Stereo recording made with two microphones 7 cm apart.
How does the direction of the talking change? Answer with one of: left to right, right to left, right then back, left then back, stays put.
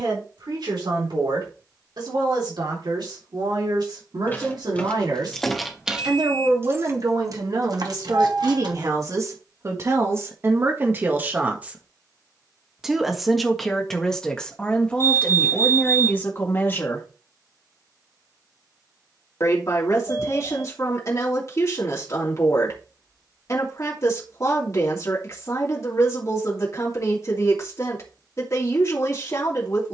right to left.